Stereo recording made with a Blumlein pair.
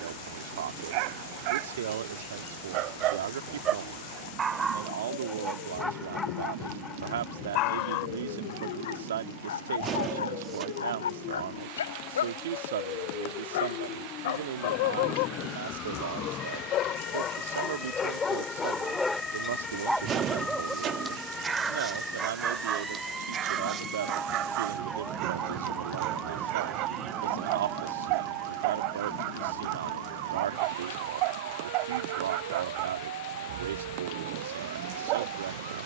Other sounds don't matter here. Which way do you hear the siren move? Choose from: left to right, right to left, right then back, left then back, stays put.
left to right.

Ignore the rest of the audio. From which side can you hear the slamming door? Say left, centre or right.
right.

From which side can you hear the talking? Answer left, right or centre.
right.